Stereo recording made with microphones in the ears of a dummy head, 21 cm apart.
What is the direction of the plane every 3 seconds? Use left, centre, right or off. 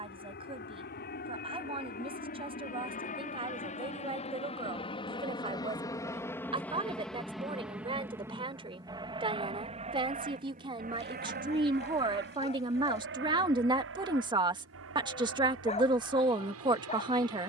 left, left, centre, right, right, right.